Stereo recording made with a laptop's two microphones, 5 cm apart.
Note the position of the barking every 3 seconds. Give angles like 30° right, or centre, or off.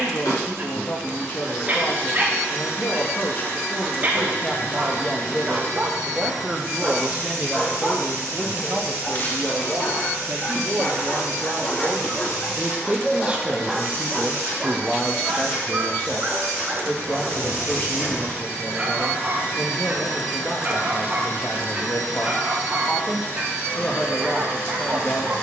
40° right, 30° right, centre, 40° left, centre, 30° right, 30° right, 30° right, 30° right.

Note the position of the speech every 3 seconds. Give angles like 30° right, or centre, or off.
40° left, 30° left, 20° right, 40° right, 10° right, 30° left, 40° left, 40° left, 40° left.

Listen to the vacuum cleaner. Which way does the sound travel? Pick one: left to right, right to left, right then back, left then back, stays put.
stays put.